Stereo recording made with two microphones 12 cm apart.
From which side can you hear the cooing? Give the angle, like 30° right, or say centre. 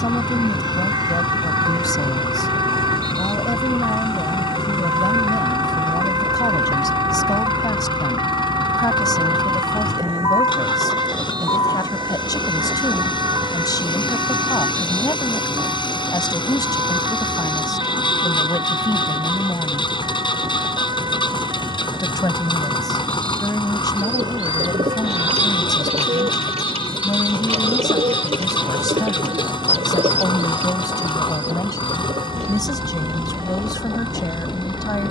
60° right.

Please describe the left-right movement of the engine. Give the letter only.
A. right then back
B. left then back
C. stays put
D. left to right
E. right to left
C.